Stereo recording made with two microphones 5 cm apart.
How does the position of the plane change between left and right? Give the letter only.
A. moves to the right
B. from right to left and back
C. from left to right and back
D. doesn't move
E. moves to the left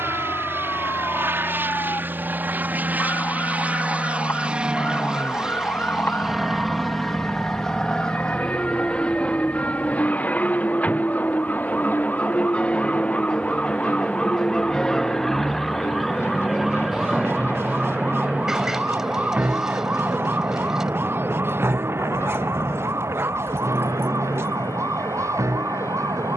E.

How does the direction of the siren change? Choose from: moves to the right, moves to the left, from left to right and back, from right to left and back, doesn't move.
moves to the right.